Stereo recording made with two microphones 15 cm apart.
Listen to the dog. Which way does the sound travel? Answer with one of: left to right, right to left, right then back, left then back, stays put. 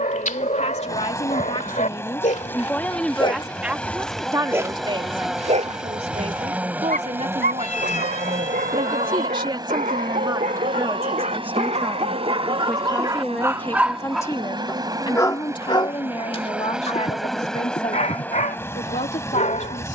right then back.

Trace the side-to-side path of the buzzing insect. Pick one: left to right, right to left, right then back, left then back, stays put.
right then back.